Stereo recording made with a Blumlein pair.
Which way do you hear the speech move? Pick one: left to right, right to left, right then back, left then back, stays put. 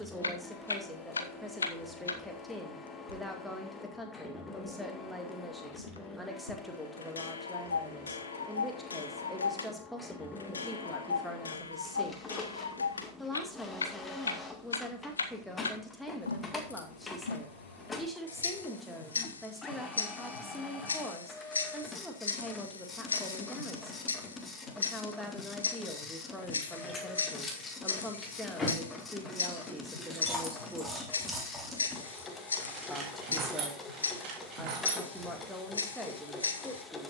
stays put.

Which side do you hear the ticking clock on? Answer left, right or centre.
left.